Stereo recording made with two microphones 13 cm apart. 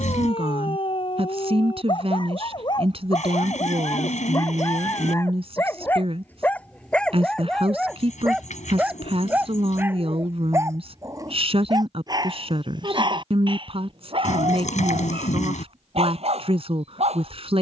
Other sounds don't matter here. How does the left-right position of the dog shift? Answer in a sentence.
You can hear the dog move to the right.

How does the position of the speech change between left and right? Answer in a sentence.
In this clip you hear the speech stay in one place.